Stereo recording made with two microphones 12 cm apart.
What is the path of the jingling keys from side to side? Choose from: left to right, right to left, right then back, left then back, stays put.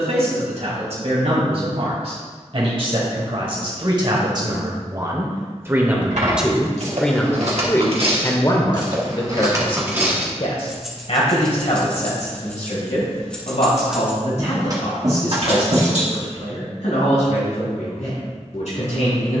left then back.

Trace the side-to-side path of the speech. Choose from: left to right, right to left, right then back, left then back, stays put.
right to left.